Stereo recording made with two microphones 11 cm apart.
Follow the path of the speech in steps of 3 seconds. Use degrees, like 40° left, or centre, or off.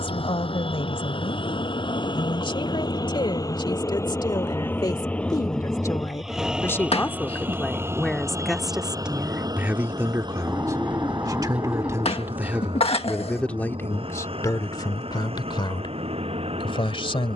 50° left, 40° left, 10° left, 20° right, 10° left, 50° left.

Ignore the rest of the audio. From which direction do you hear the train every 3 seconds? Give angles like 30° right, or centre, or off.
50° left, 20° left, 20° right, 40° right, 50° right, 60° right.